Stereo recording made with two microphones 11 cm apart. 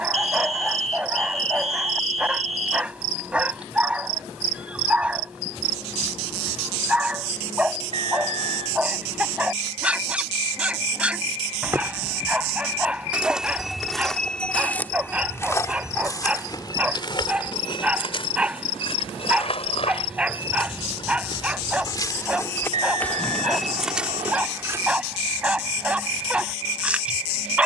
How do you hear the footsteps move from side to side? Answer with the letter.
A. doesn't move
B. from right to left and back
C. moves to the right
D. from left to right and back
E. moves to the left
B.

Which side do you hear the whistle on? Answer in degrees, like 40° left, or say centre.
70° right.